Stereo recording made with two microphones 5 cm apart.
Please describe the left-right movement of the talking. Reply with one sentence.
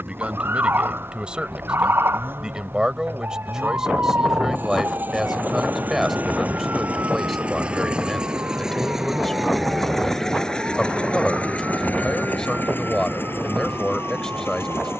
In this clip you hear the talking move from right to left.